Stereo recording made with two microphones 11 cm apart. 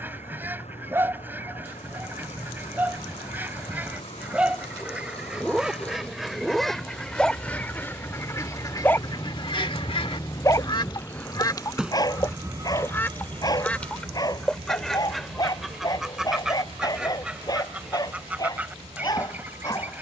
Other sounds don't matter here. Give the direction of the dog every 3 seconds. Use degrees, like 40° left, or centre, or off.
20° right, 10° right, 10° left, 30° left, 40° left, 40° left, 40° left.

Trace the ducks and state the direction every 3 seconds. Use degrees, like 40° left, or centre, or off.
20° right, 10° right, 20° left, 50° left, 10° left, 10° right, 10° right.